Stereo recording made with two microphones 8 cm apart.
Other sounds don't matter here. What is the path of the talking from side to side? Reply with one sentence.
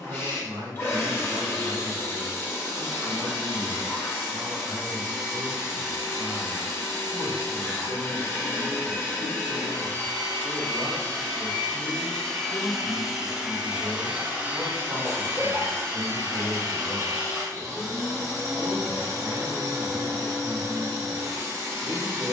In this clip you hear the talking move from right to left and back again.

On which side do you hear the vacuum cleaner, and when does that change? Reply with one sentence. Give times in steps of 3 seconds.
In this clip you hear the vacuum cleaner on the left from 0 s, in the centre from 12 s and on the right from 15 s.